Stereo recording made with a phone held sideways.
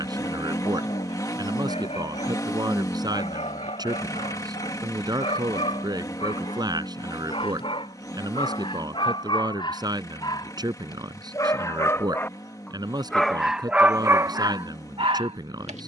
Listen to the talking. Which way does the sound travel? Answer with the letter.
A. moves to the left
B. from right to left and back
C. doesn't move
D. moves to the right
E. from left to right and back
C.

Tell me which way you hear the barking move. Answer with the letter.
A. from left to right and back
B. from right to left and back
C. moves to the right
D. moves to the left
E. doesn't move
C.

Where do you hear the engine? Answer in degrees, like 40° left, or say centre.
30° left.